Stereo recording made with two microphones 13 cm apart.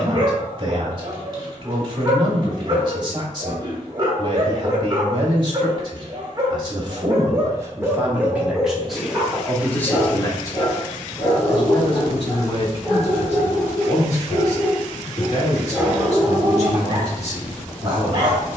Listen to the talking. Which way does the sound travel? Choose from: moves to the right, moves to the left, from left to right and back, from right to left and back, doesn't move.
moves to the left.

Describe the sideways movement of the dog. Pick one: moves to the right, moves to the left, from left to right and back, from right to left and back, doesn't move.
from right to left and back.